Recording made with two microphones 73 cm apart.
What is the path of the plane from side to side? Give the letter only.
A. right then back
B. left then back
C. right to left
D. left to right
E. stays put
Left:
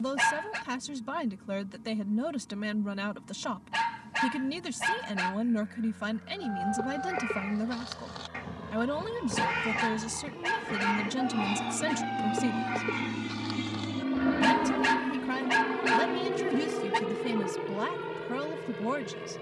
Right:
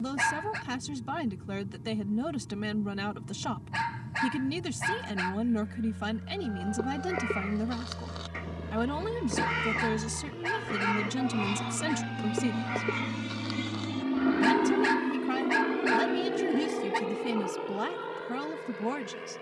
C.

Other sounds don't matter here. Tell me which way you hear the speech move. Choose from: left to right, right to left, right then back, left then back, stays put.
stays put.